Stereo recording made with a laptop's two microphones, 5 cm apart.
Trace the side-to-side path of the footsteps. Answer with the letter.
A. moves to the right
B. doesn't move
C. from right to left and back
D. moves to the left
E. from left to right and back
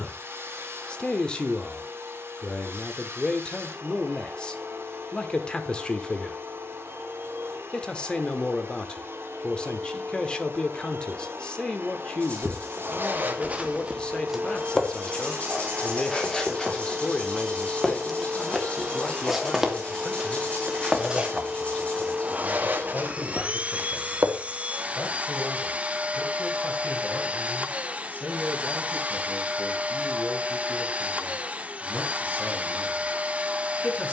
C.